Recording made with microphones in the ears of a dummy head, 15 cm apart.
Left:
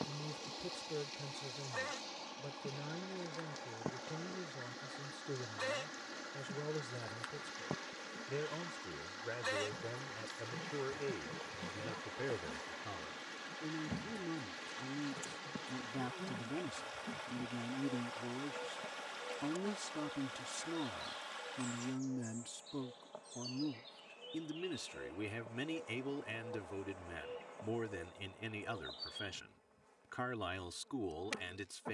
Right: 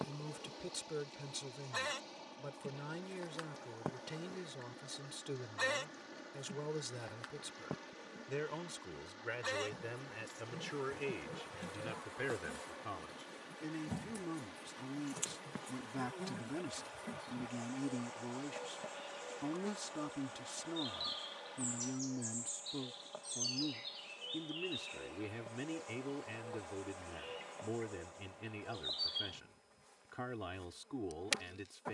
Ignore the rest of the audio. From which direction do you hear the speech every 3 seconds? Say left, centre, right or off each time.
right, right, right, right, right, right, centre, centre, left, left, left.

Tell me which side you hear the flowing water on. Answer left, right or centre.
left.